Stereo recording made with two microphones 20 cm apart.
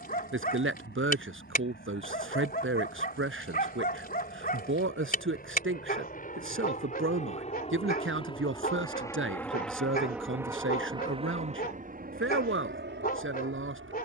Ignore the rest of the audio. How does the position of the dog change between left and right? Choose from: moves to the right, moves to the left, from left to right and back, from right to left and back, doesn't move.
doesn't move.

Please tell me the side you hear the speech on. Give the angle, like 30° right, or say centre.
70° right.